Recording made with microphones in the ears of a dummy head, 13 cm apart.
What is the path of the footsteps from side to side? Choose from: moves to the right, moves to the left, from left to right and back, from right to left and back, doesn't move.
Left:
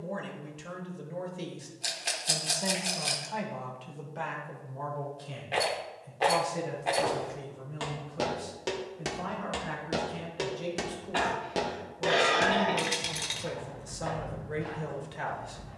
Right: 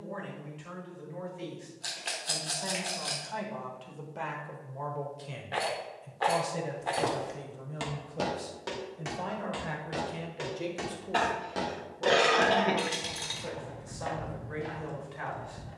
from right to left and back.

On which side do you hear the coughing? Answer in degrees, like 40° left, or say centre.
50° right.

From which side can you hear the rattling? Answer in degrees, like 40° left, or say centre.
20° left.